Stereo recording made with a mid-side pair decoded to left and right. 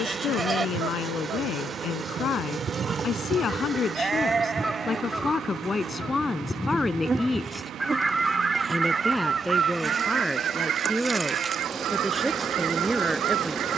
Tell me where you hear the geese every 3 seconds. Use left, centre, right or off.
right, centre, centre, right, right.